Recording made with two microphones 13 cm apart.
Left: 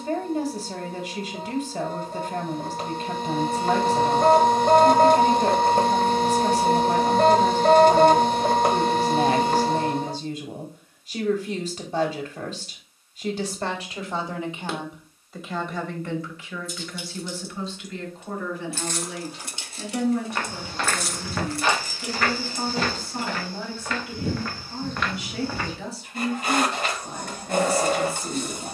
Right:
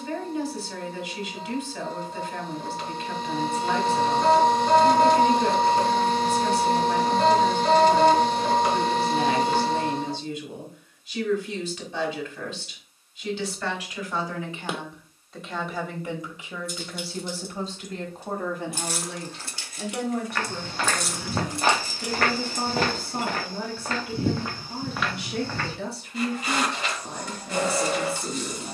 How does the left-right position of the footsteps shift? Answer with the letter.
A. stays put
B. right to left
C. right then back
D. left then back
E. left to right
C.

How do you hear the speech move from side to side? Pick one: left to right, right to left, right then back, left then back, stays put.
left to right.